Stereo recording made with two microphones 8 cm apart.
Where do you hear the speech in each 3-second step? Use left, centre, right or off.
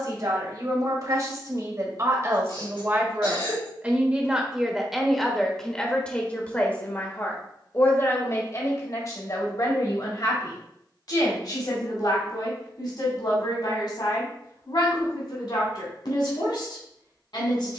right, centre, left, left, left, left.